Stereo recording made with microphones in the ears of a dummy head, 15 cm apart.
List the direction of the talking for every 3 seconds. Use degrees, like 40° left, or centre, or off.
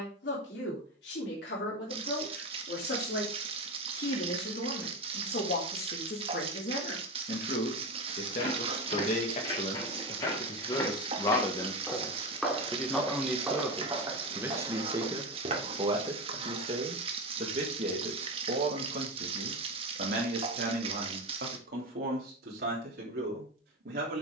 70° left, 60° left, 50° left, 30° left, centre, 30° right, 50° right, 60° right.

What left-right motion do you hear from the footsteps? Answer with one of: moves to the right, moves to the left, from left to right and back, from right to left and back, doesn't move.
moves to the right.